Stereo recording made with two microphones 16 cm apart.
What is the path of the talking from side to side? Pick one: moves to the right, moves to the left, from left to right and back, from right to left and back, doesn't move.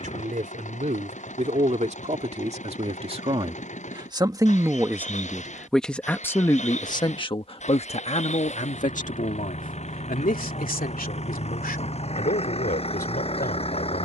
moves to the left.